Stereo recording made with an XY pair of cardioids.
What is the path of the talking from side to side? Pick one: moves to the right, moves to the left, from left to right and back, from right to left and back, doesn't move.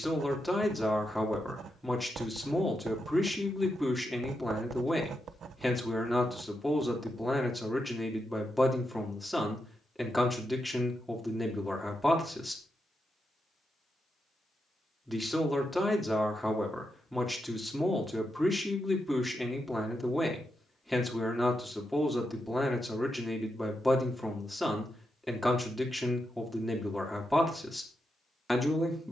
doesn't move.